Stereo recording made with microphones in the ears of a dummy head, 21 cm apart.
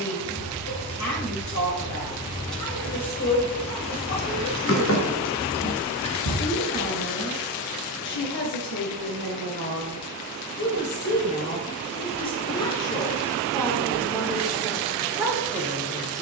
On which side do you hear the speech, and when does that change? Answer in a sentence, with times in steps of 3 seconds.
You can hear the speech on the left from 0 s and in the centre from 12 s.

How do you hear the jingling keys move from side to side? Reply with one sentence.
In this clip you hear the jingling keys travel towards the left.